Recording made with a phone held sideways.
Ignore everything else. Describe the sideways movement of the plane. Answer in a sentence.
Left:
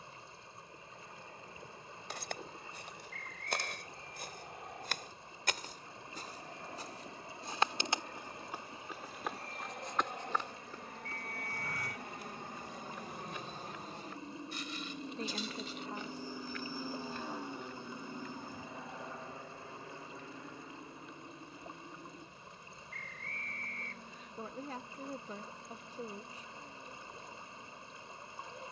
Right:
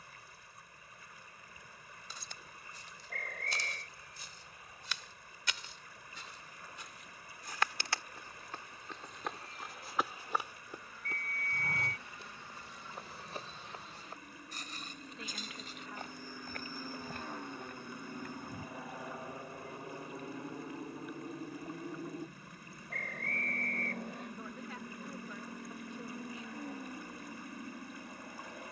You can hear the plane go from the left side to the right.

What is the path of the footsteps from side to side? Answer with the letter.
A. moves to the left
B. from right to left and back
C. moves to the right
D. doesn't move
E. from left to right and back
C.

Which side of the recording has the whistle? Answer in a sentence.
In this clip you hear the whistle on the right.